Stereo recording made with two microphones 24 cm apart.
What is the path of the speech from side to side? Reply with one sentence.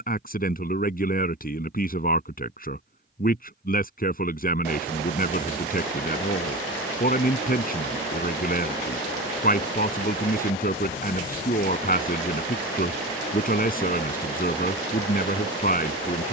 You can hear the speech stay put.